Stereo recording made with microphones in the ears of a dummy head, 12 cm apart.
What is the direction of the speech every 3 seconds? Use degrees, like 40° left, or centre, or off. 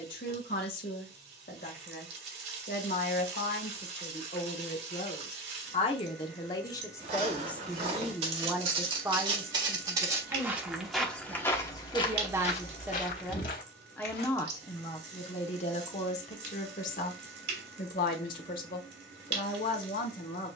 80° left, 60° left, 10° left, 30° right, centre, 50° left, 70° left.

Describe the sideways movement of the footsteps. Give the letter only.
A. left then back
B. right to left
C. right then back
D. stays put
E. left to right
B.